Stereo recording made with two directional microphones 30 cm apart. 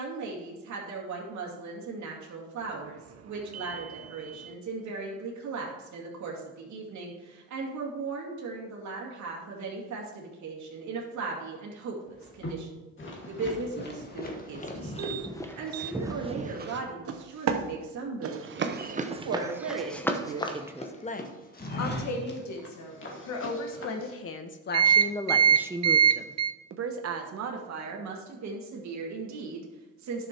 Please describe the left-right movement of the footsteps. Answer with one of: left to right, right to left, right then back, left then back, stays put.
right then back.